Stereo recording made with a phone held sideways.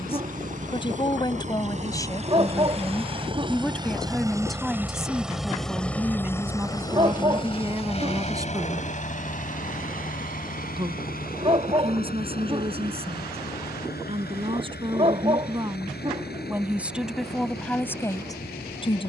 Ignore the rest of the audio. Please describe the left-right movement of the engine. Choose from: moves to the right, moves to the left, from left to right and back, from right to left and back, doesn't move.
moves to the left.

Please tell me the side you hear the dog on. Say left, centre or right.
right.